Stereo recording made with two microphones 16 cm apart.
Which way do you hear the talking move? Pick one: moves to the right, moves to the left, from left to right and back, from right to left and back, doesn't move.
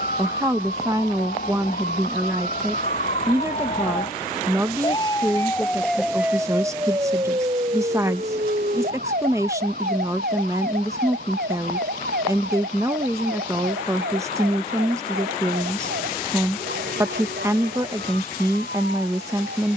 doesn't move.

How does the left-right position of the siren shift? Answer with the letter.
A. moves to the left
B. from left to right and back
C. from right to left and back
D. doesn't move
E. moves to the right
E.